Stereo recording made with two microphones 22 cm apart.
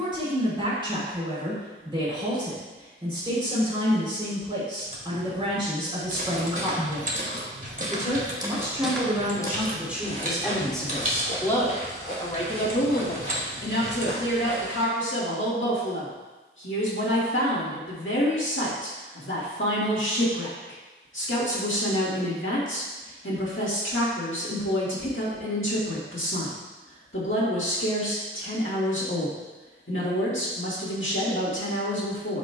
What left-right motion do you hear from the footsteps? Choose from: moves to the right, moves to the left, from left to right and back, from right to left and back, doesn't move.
moves to the left.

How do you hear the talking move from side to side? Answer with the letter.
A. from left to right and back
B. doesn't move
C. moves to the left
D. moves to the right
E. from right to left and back
C.